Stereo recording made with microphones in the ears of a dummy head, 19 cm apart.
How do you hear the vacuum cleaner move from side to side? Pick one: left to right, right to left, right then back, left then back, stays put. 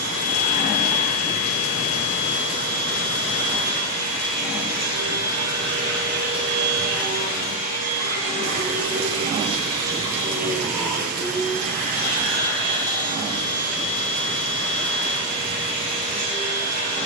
right then back.